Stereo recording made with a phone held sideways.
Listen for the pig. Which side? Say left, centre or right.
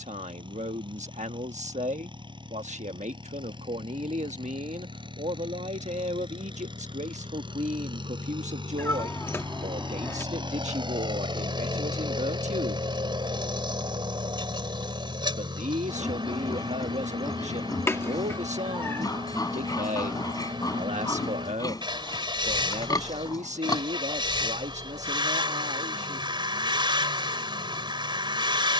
left.